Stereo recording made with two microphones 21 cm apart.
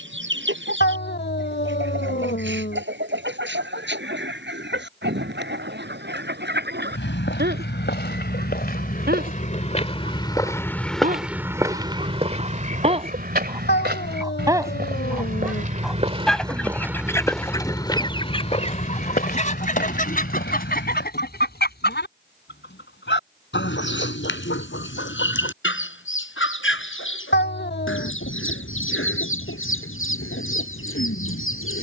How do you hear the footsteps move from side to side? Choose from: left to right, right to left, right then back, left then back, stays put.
right then back.